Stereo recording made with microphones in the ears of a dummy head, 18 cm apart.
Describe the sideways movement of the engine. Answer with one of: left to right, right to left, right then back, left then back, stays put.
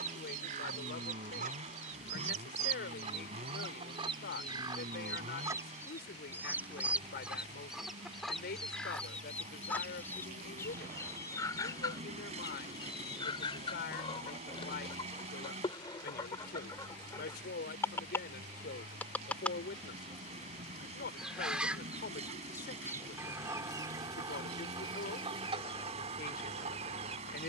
stays put.